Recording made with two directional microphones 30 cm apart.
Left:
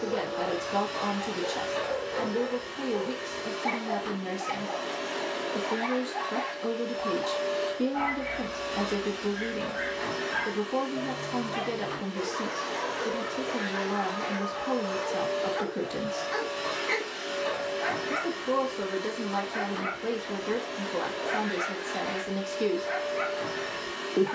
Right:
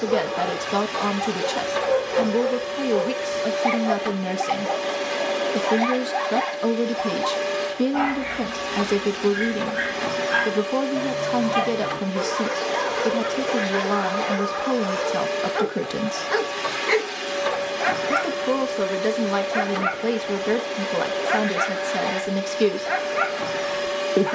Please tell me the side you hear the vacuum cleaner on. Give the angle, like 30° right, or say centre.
70° right.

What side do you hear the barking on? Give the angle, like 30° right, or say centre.
60° right.